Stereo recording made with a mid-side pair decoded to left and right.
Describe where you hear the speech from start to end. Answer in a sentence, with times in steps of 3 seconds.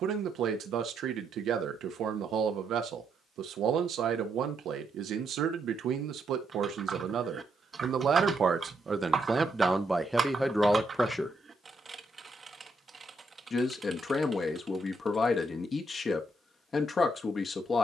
In this clip you hear the speech on the right from 0 s, in the centre from 9 s and on the left from 12 s.